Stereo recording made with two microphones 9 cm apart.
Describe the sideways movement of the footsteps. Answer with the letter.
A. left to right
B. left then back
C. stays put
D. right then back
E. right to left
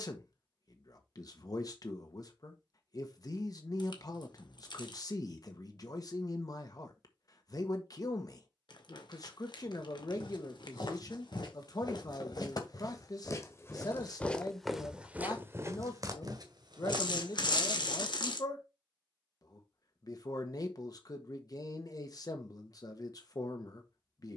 A.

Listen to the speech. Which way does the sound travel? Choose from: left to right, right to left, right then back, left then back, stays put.
stays put.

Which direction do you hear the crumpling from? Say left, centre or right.
left.